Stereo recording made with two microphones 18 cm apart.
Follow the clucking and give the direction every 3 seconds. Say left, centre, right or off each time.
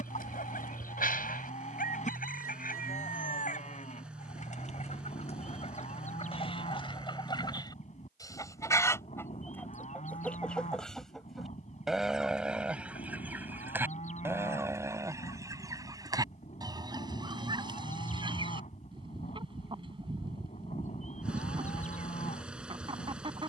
left, left, left, centre, centre, right, right, right.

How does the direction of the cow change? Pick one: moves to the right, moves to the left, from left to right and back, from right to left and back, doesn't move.
doesn't move.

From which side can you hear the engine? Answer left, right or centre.
centre.